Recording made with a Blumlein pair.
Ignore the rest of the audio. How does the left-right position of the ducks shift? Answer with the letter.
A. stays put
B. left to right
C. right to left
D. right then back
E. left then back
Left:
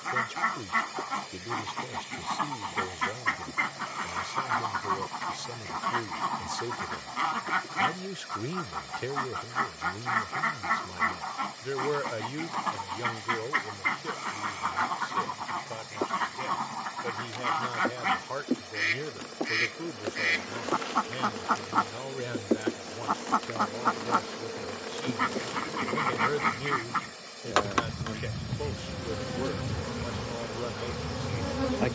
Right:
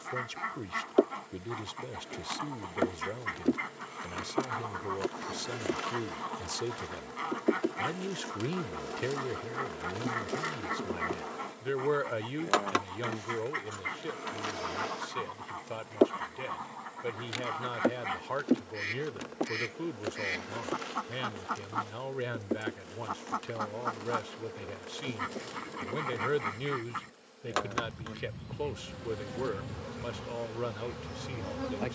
A.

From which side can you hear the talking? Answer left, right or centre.
centre.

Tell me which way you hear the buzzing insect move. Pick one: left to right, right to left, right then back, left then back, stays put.
right to left.